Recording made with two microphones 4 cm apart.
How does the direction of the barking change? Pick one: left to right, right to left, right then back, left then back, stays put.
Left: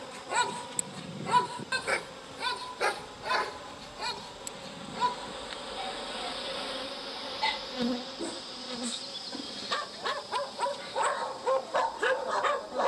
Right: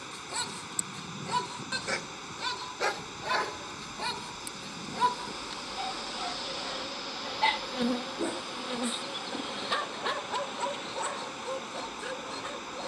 right then back.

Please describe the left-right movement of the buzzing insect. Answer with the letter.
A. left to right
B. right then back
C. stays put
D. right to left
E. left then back
A.